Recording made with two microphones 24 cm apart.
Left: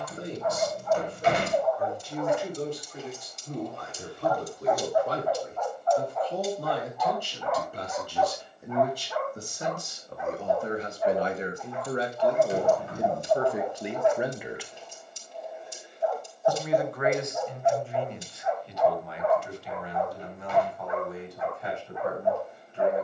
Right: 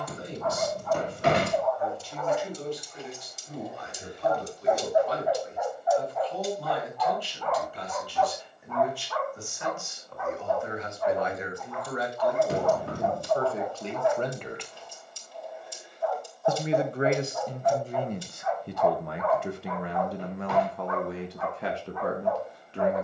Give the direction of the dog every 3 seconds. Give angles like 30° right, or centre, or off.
20° left, 10° right, 10° left, 20° left, 20° left, 20° left, 20° left, 20° left.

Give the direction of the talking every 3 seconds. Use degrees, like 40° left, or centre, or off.
50° left, 50° left, 50° left, 40° left, 20° left, 30° right, 60° right, 80° right.